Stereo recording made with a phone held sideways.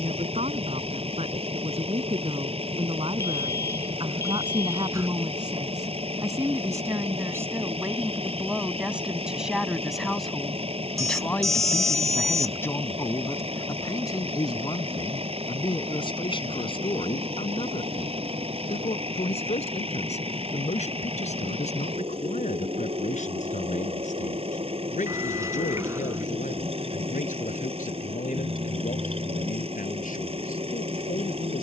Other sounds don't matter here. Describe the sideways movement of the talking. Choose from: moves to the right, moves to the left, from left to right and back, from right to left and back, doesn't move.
moves to the left.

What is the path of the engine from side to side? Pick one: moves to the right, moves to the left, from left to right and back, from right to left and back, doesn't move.
doesn't move.